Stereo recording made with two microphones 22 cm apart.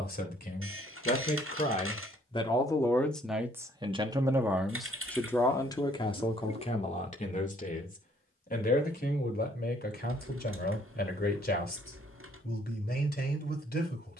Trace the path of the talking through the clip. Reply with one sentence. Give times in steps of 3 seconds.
You can hear the talking on the left from 0 s, in the centre from 3 s and on the left from 6 s.